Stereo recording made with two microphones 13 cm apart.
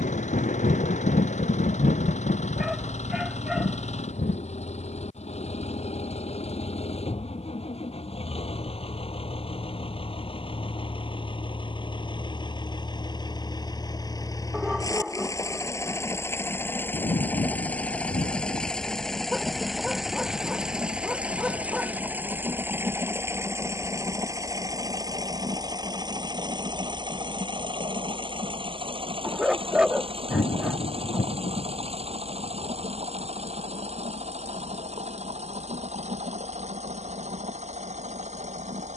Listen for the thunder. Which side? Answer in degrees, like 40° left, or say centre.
90° left.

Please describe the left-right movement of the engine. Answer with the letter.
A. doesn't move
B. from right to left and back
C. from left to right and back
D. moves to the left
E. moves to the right
E.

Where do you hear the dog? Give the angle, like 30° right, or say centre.
10° right.